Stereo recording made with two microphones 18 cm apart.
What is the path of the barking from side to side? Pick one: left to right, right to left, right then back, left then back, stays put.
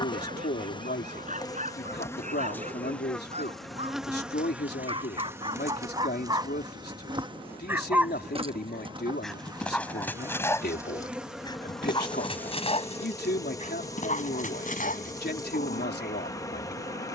right to left.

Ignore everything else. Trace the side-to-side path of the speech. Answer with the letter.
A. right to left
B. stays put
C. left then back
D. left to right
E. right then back
B.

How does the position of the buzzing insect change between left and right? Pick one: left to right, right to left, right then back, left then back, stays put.
right then back.